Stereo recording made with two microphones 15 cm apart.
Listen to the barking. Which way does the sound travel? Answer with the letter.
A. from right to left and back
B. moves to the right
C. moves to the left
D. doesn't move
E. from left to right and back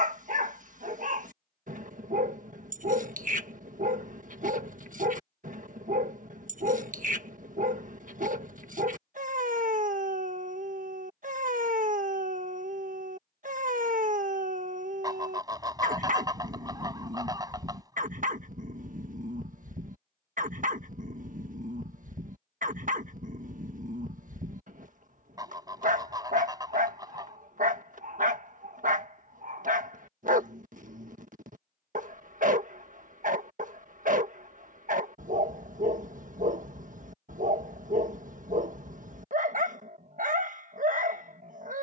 D.